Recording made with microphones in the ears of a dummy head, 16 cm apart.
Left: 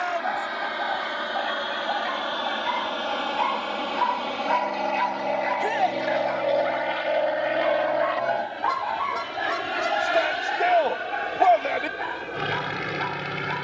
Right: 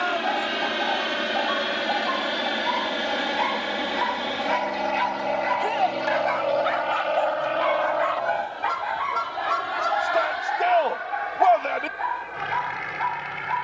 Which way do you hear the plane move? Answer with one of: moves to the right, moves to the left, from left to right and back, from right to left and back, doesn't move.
moves to the left.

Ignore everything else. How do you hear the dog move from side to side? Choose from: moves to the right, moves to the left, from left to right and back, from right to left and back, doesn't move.
from left to right and back.